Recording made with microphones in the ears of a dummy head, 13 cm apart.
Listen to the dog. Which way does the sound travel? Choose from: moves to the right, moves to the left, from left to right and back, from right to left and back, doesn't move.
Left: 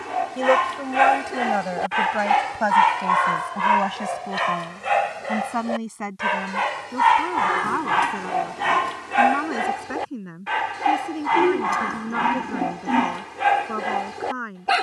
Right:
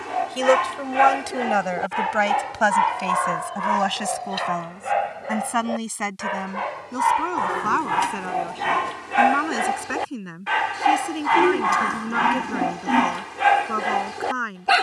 from right to left and back.